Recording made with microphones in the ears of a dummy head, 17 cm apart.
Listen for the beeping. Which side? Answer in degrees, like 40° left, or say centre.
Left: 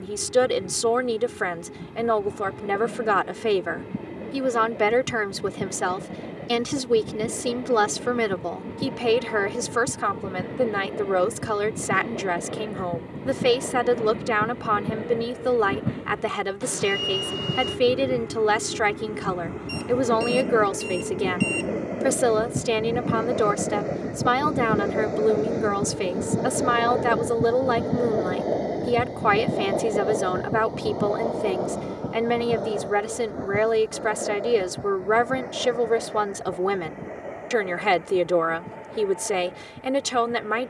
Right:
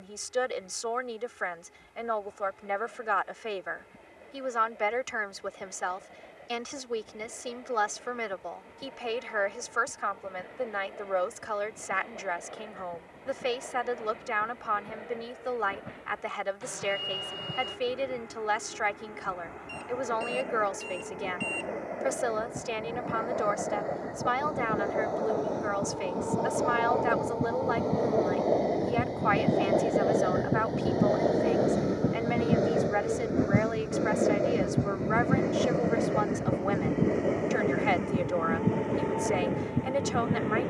50° left.